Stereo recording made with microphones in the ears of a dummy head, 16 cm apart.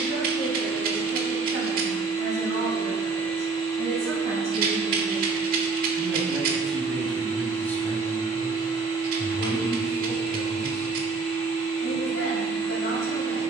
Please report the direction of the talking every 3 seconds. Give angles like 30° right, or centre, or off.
30° right, 20° right, 10° left, 40° left, 60° left.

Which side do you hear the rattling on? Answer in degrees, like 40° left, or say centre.
50° right.